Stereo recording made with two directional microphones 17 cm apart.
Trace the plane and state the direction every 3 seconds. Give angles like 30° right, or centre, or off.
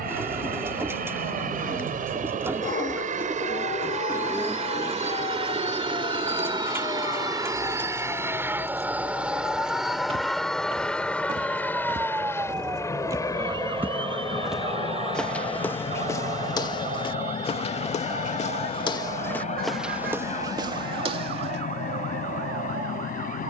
60° right, 40° right, 20° right, centre, 20° left, 30° left, 40° left, 50° left.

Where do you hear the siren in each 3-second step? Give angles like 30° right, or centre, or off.
60° left, 50° left, 30° left, 10° left, 20° right, 50° right, 60° right, 70° right.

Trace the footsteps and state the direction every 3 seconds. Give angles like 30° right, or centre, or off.
off, off, off, 30° right, 20° right, 20° left, 10° left, 40° right.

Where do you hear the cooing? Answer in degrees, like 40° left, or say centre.
10° right.